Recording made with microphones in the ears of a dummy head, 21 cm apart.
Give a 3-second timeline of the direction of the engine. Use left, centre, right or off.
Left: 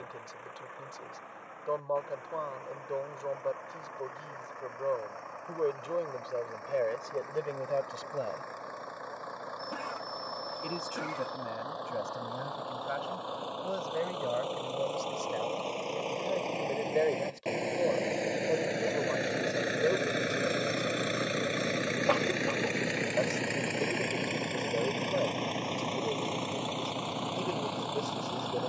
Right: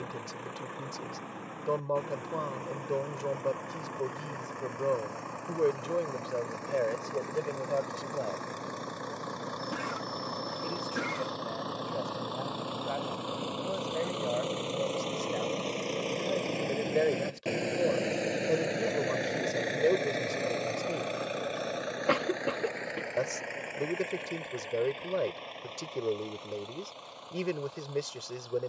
right, right, right, right, right, right, centre, left, left, left.